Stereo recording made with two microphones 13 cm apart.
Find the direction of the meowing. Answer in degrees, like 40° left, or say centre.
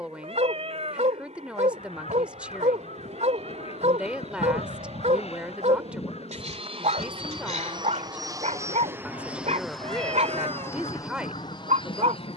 60° right.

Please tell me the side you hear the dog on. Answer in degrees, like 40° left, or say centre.
60° right.